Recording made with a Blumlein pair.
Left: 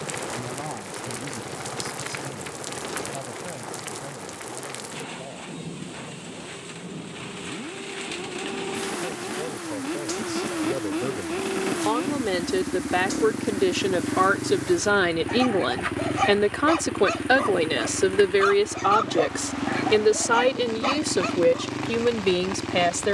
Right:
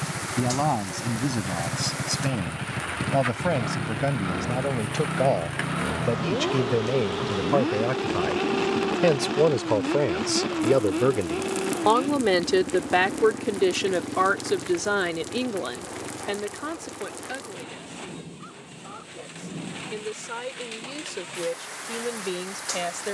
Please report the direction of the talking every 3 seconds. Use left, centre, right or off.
right, right, right, right, centre, left, left, left.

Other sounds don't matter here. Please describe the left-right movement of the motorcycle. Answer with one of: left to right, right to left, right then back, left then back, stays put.
right to left.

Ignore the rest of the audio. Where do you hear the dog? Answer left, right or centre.
left.